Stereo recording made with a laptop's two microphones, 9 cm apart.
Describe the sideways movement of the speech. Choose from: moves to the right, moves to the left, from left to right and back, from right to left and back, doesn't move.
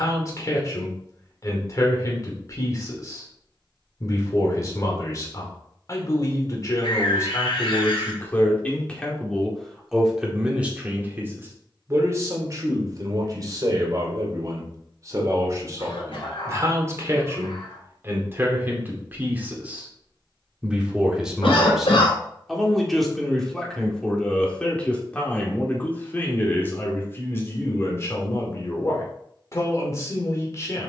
from left to right and back.